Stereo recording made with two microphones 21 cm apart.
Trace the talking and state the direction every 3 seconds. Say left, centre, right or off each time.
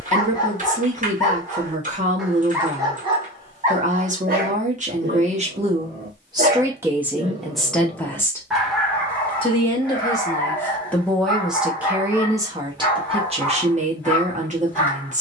right, right, centre, centre, right.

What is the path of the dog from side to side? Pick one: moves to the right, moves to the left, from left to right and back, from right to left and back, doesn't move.
from left to right and back.